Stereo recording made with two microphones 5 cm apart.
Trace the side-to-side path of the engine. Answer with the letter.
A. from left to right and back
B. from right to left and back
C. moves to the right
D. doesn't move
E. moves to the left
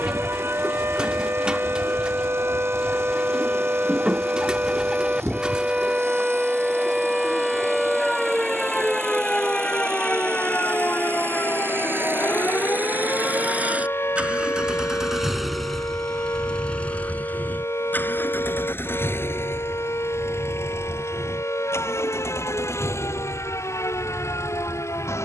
E.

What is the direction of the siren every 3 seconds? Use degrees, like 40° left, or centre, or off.
50° right, 30° right, centre, 30° left, 50° left, 60° left, 70° left, 70° left, 80° left.